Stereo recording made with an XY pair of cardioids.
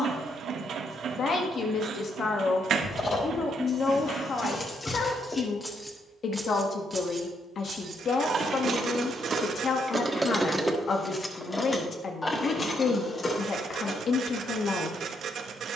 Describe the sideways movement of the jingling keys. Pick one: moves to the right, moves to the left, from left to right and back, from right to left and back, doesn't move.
from left to right and back.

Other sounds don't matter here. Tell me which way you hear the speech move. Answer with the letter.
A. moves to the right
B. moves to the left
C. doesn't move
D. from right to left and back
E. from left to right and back
C.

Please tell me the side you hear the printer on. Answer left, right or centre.
right.